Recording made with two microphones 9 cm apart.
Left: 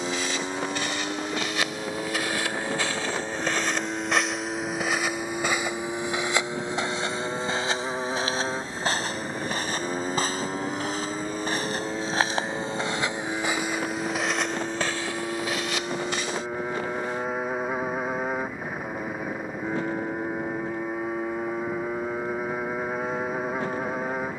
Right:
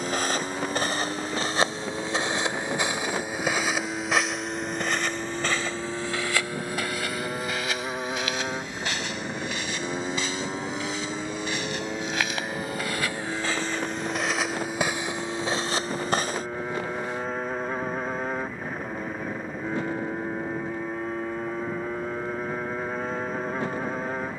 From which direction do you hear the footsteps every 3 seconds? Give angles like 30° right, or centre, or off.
30° right, centre, 30° left, 40° left, 10° left, 30° right, off, off.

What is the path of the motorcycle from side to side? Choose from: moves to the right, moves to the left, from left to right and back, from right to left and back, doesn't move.
doesn't move.